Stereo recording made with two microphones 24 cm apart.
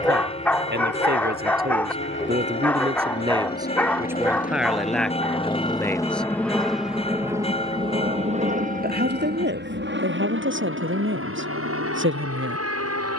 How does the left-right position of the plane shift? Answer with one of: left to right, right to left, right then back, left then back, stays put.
left to right.